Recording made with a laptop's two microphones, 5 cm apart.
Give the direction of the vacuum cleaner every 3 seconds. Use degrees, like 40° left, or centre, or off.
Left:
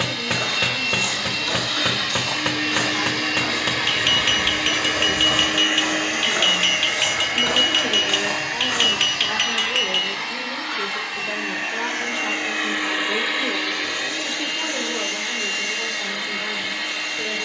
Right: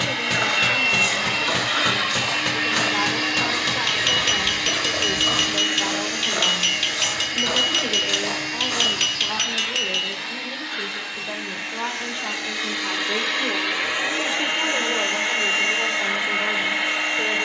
20° right, 20° left, 50° left, 70° left, centre, 30° right.